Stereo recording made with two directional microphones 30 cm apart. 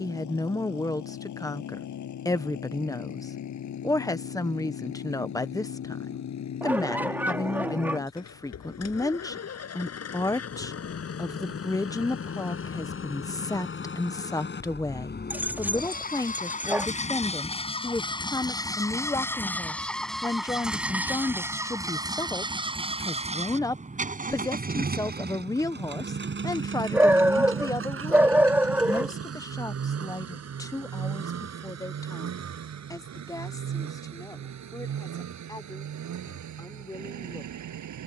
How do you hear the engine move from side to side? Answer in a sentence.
You can hear the engine move from left to right.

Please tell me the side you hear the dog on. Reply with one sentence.
You can hear the dog in the centre.